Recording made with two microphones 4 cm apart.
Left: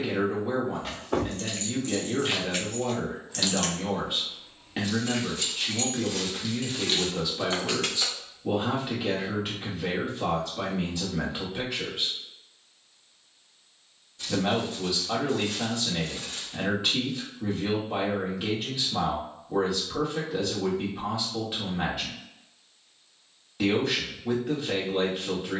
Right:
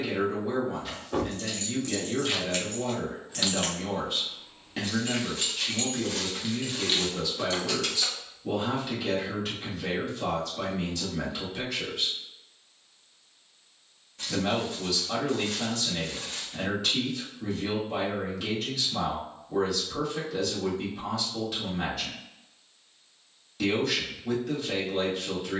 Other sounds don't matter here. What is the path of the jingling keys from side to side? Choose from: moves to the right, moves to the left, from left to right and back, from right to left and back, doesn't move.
from left to right and back.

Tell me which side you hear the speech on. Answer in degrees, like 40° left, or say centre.
20° left.